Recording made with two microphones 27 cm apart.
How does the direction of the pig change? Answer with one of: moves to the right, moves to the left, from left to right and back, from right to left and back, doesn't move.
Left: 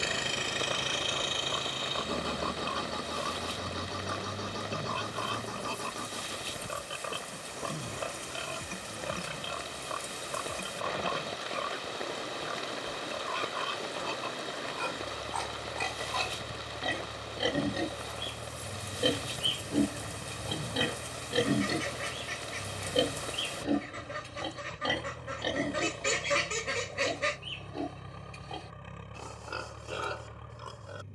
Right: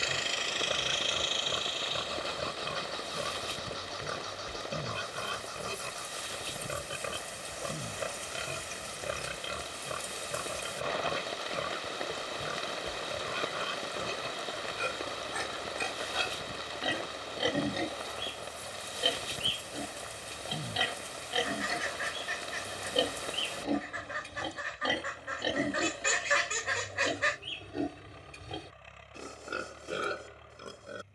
from right to left and back.